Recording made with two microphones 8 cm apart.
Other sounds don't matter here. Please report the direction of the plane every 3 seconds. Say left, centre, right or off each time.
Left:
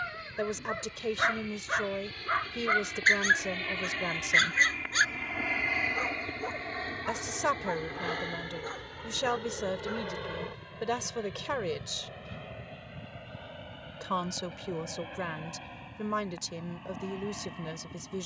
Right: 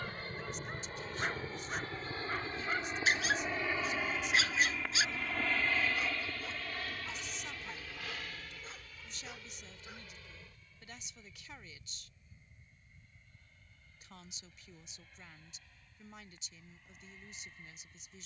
right, centre, left, left, left, left.